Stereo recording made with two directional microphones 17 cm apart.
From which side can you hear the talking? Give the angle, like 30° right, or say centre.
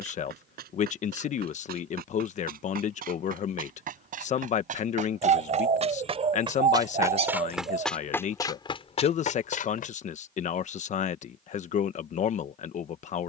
40° left.